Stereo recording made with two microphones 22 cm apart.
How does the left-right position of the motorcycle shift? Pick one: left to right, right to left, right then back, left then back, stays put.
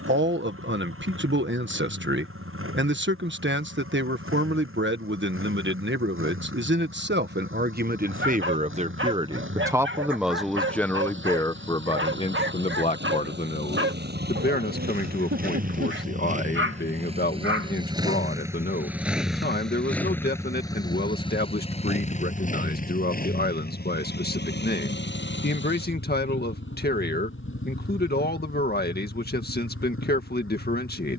right to left.